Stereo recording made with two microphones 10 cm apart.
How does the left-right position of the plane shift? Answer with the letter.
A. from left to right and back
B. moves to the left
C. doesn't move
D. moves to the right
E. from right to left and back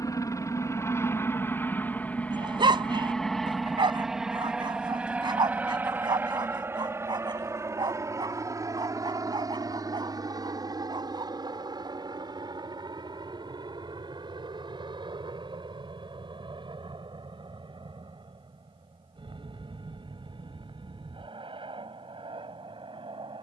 D.